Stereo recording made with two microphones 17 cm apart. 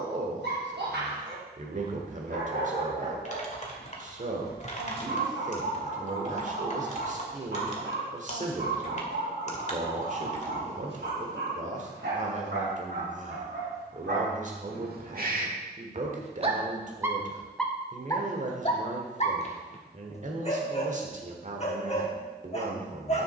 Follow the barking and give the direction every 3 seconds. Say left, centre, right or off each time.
right, right, right, right, right, right, left, left.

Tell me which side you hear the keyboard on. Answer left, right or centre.
left.